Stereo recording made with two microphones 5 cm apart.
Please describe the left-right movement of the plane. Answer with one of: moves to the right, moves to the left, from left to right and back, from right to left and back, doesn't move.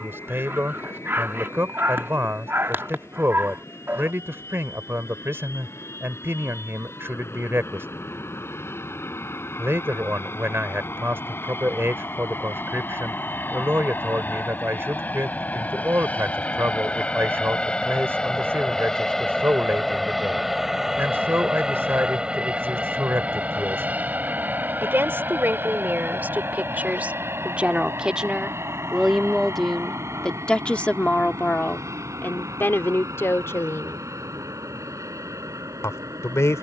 moves to the right.